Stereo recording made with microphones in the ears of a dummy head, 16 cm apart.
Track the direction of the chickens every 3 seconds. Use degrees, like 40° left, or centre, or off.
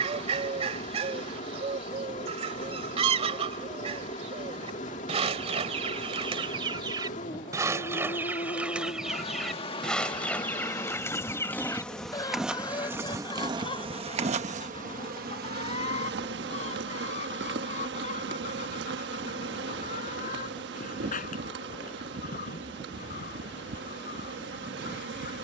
40° right, 40° right, 20° right, 10° left, 30° left, 40° left, 50° left, 50° left, 50° left.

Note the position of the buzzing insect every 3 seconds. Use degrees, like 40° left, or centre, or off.
40° left, 40° left, 40° left, 20° left, 20° right, 60° right, 60° right, 60° right, 60° right.